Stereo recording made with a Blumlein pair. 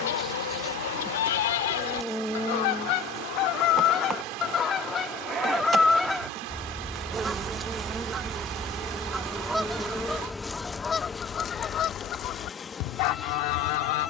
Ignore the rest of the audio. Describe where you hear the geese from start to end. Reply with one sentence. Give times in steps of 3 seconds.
In this clip you hear the geese on the left from 0 s, in the centre from 6 s and on the left from 12 s.